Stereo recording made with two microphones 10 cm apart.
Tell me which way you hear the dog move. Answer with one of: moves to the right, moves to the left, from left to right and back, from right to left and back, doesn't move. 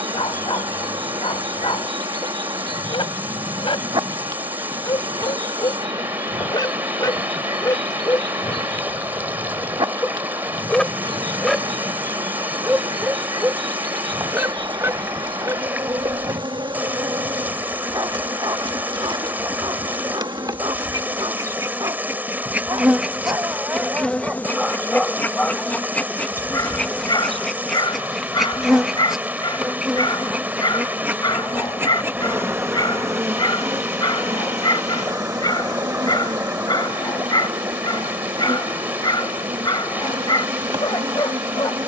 from left to right and back.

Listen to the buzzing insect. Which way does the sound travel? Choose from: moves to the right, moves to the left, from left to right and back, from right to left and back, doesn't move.
from right to left and back.